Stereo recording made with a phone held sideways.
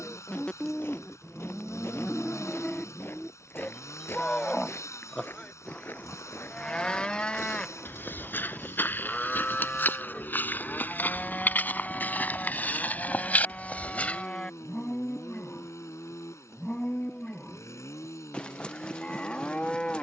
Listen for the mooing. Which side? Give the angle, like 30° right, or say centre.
10° left.